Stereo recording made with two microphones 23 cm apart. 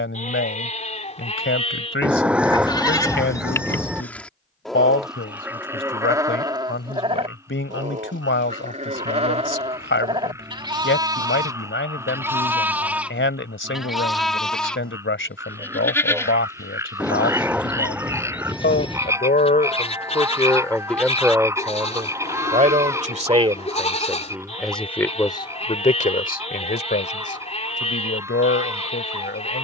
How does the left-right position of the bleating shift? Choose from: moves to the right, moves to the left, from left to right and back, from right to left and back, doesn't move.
from left to right and back.